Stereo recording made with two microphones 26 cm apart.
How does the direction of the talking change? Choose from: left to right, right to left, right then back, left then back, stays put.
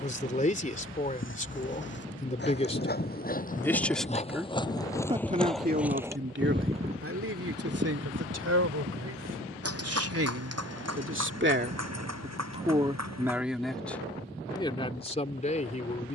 right then back.